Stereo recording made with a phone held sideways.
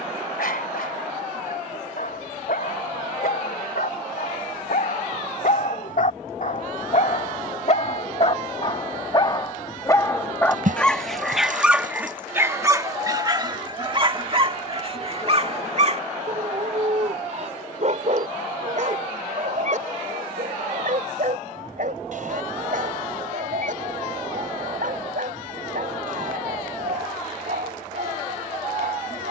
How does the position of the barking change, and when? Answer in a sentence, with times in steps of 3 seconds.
In this clip you hear the barking on the left from 0 s, in the centre from 9 s and on the right from 12 s.